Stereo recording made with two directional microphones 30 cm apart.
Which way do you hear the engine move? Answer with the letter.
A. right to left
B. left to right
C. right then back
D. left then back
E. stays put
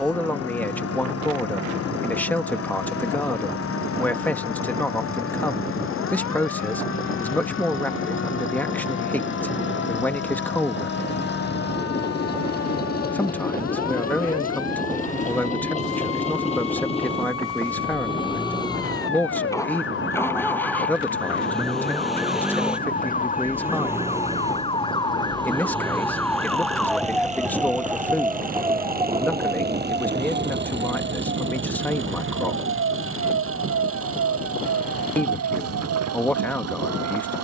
B.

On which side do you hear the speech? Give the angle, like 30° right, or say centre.
10° left.